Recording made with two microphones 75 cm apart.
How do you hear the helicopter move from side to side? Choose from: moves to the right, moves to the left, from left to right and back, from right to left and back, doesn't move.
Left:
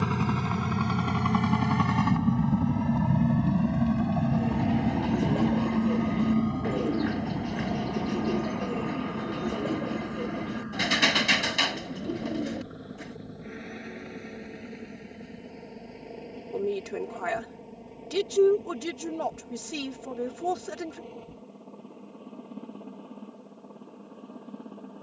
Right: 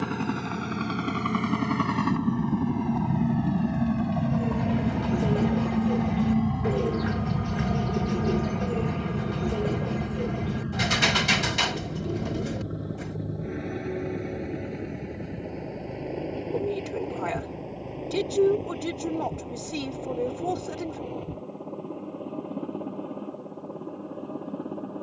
moves to the right.